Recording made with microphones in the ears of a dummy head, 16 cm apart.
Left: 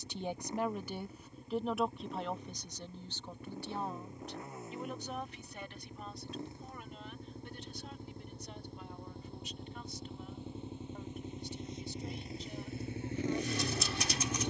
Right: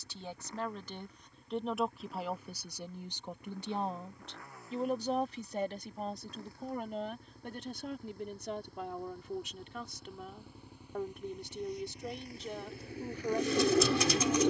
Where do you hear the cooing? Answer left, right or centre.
right.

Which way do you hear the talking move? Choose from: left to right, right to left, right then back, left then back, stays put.
left to right.